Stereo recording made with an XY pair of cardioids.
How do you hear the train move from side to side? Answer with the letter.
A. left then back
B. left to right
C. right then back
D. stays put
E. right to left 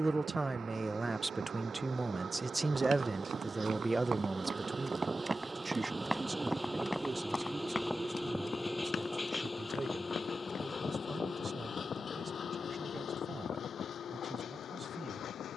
E.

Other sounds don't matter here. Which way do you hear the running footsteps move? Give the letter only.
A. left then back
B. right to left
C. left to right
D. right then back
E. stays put
B.